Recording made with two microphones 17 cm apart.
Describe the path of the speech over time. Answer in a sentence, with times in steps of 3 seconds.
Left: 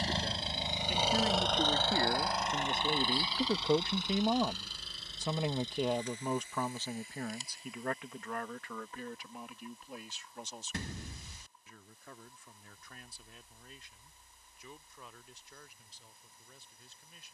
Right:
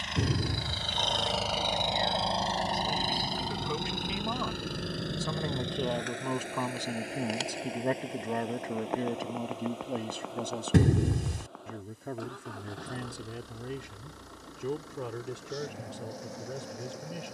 You can hear the speech on the left from 0 s and on the right from 6 s.